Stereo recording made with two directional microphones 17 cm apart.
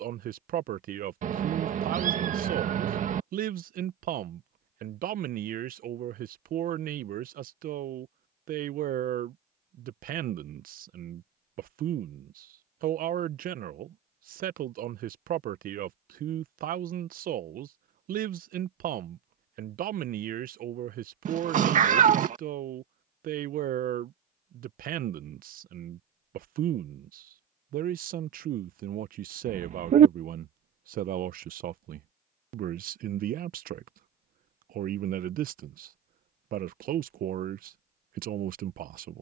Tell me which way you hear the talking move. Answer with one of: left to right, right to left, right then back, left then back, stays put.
stays put.